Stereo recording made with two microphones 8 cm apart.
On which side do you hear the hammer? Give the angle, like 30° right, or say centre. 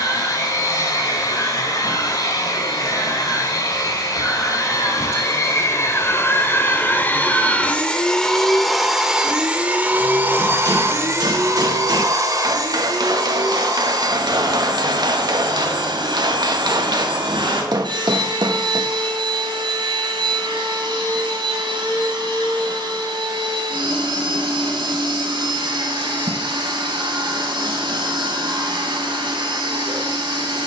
60° right.